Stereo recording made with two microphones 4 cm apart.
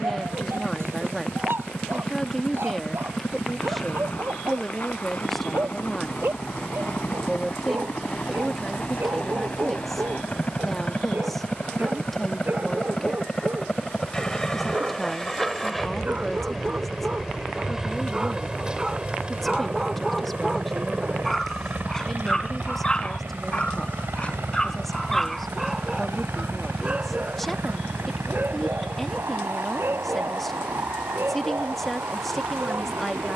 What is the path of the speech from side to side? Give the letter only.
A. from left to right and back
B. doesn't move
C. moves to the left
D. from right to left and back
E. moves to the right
B.